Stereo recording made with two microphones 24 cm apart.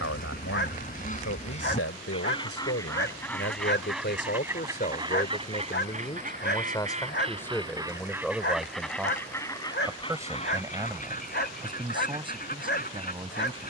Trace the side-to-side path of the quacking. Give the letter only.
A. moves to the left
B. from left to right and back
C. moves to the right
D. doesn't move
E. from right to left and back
B.